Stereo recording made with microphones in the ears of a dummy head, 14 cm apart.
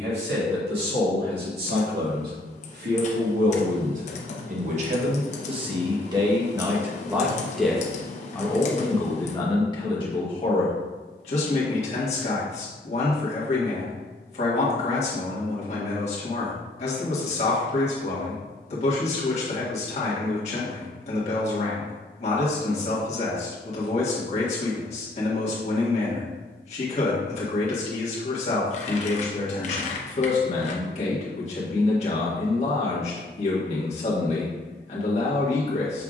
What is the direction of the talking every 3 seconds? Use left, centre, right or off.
right, right, centre, left, left, left, left, left, left, left, left, left.